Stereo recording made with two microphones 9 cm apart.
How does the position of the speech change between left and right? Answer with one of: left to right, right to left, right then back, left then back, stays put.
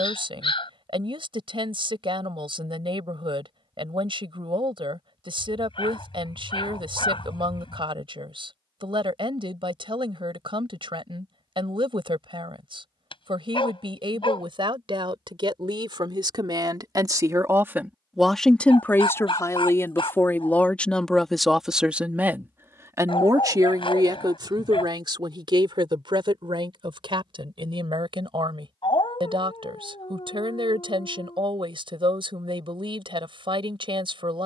left then back.